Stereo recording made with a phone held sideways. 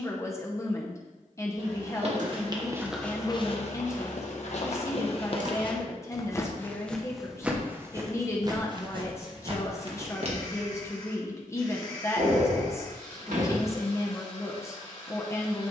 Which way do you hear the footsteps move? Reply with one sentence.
You can hear the footsteps go left and come back.